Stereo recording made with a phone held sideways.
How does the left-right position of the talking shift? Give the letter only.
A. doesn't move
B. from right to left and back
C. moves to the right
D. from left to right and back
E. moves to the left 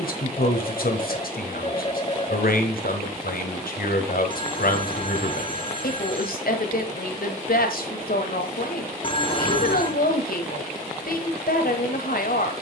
A.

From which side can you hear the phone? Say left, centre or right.
left.